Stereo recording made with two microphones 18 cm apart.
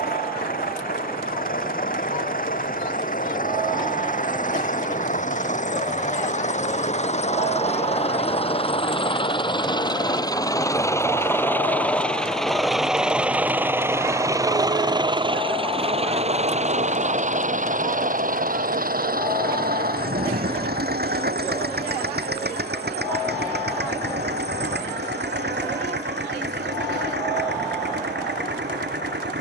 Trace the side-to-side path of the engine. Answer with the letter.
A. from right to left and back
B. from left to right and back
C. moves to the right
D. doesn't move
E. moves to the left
C.